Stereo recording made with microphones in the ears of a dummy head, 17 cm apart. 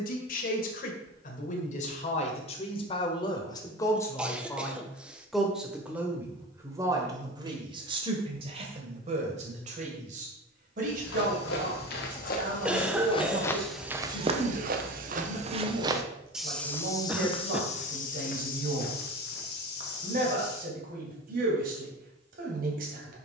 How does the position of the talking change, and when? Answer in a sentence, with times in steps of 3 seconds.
You can hear the talking on the left from 0 s, in the centre from 3 s and on the right from 6 s.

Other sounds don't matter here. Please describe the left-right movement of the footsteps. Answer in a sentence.
In this clip you hear the footsteps move from left to right and back again.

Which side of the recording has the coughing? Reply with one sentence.
In this clip you hear the coughing in the centre.